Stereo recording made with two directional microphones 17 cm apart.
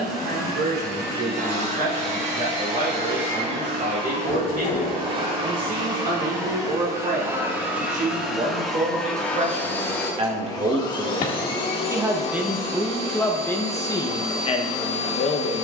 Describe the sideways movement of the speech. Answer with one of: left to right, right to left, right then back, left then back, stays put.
right to left.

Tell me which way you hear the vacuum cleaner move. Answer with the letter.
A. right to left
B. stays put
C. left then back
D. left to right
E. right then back
A.